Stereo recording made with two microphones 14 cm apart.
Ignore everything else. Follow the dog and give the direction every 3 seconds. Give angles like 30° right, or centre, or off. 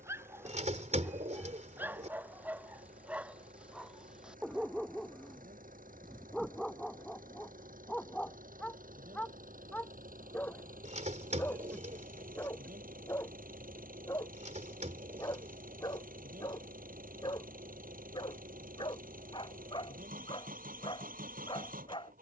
10° right, 10° right, centre, 10° left, 20° left, 30° left, 30° left, 30° left.